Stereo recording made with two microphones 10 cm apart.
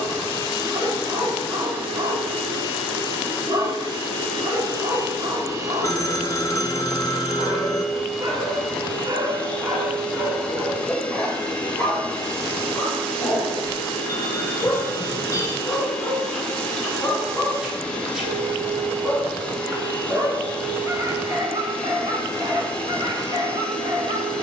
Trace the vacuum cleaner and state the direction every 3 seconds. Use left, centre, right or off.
right, right, centre, centre, centre, centre, centre, centre.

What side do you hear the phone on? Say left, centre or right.
left.